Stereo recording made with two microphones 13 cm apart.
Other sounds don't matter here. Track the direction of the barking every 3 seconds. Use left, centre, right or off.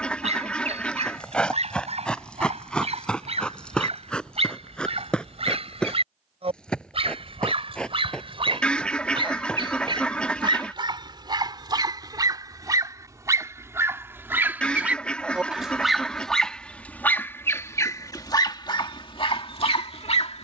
right, right, right, right, right, centre, left.